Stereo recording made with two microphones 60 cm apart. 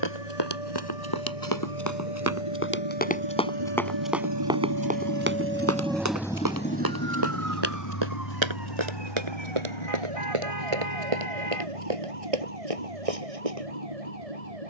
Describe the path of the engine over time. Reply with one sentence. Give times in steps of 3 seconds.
In this clip you hear the engine on the right from 0 s and on the left from 6 s.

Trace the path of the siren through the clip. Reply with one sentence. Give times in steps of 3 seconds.
You can hear the siren on the left from 0 s and on the right from 6 s.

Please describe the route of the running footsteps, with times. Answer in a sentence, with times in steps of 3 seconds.
In this clip you hear the running footsteps on the left from 0 s, in the centre from 3 s and on the right from 6 s.